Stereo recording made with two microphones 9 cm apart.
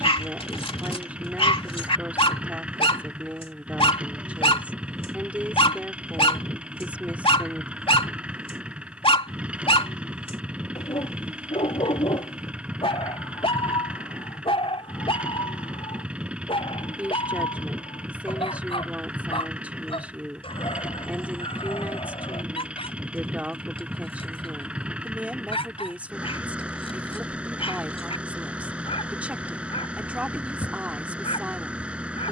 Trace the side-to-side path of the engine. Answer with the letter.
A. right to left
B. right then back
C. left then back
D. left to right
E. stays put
E.